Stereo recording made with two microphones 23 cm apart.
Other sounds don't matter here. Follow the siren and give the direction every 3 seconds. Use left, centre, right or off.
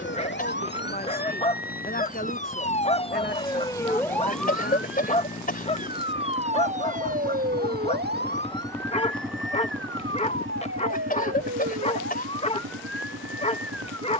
left, centre, right, right, right.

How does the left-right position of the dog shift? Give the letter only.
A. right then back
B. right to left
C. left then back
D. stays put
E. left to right
D.